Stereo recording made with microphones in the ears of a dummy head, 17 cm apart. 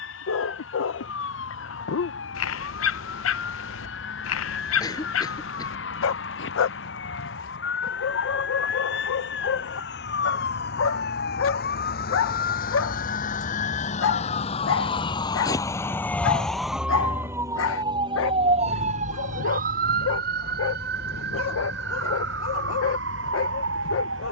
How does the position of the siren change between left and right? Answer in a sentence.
You can hear the siren go from the left side to the right.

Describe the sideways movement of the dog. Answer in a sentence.
In this clip you hear the dog stay in one place.